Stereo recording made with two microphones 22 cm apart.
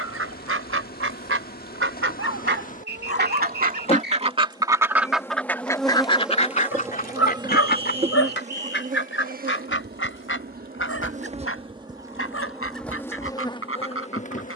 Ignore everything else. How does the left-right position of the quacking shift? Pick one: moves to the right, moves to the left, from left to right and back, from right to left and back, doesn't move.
moves to the left.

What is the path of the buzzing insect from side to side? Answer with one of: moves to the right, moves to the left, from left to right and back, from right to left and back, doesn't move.
from left to right and back.